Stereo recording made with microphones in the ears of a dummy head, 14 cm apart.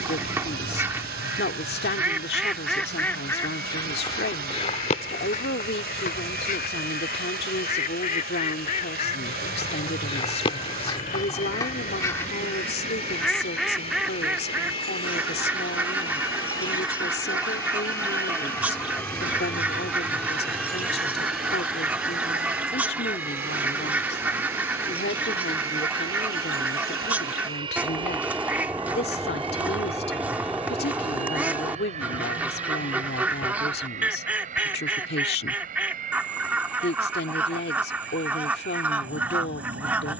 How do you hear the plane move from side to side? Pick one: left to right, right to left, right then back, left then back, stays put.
left to right.